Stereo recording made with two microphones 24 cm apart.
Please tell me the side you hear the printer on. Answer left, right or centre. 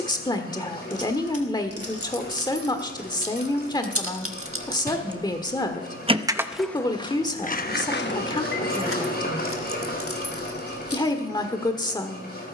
left.